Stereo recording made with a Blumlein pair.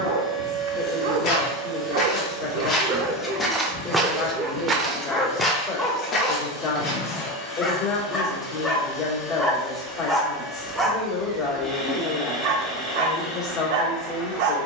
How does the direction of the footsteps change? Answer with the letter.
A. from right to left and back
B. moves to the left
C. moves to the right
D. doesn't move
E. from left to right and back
E.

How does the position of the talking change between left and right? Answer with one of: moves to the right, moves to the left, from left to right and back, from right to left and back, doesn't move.
doesn't move.